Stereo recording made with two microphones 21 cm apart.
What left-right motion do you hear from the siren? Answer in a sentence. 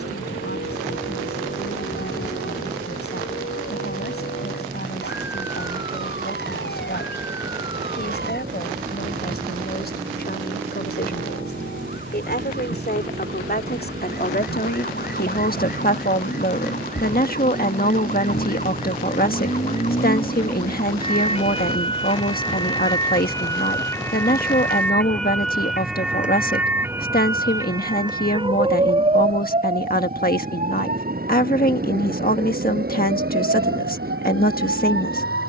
You can hear the siren travel towards the right.